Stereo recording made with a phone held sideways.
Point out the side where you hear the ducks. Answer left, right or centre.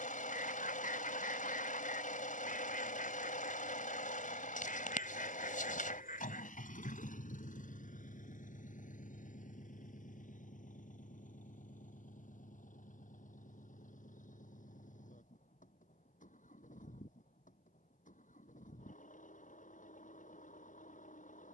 left.